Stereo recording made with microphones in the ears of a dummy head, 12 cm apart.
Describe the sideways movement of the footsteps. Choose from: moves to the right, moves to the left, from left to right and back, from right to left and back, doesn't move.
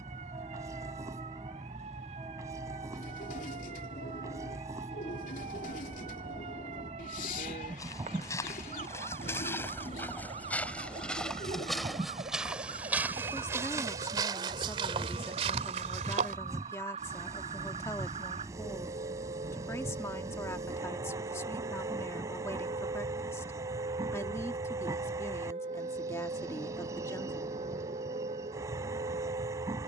moves to the right.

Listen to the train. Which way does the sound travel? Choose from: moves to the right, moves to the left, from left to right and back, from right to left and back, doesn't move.
doesn't move.